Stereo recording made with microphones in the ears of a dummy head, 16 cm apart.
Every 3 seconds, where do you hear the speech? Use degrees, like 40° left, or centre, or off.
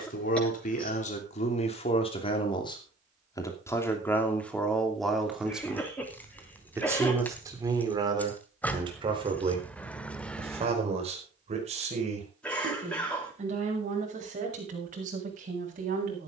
40° left, 10° left, 20° right, 40° right, 50° right, 50° right.